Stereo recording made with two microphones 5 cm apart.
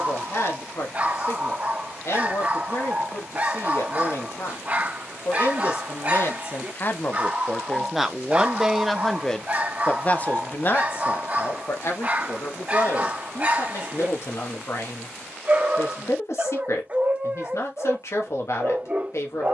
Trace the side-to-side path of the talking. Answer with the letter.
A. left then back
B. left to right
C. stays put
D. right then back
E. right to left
D.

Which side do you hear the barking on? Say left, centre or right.
right.